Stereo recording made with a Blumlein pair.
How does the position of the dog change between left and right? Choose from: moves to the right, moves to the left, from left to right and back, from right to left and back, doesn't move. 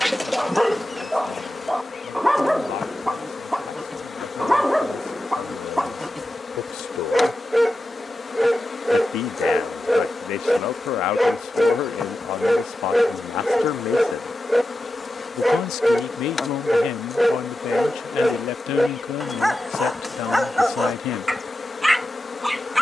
doesn't move.